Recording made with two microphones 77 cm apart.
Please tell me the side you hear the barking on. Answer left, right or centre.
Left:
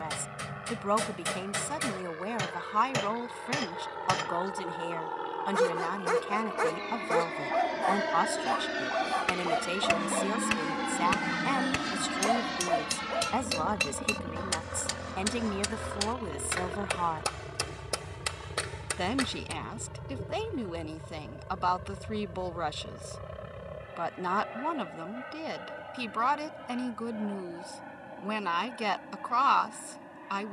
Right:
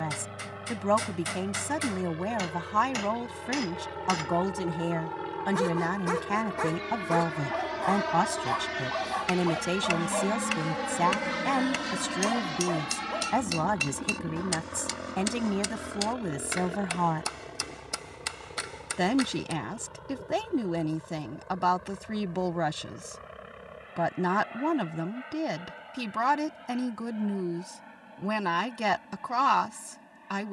left.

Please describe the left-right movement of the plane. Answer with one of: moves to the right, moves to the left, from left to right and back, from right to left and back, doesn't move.
moves to the left.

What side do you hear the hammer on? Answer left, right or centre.
left.